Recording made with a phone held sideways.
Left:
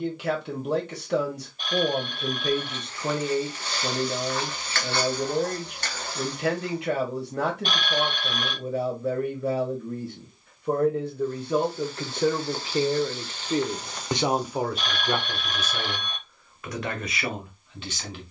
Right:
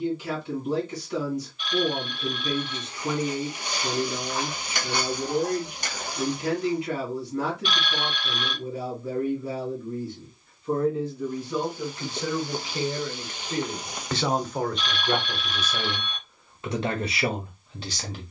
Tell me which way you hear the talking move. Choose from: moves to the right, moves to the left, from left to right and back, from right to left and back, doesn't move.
moves to the right.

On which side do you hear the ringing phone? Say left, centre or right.
left.